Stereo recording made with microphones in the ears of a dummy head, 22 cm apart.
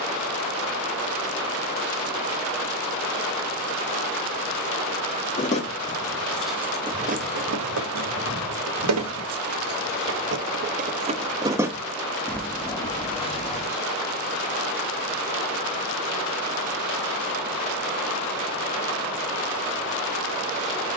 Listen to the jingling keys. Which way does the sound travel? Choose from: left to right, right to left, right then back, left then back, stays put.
right then back.